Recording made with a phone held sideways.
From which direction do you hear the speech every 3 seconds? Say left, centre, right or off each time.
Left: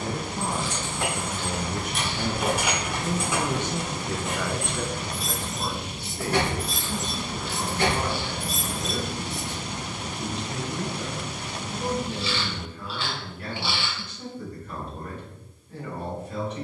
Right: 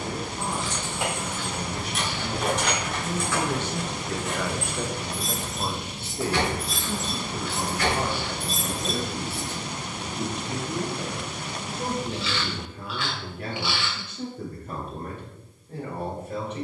left, centre, right, right, right, right.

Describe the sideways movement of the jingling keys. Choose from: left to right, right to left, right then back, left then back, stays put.
left then back.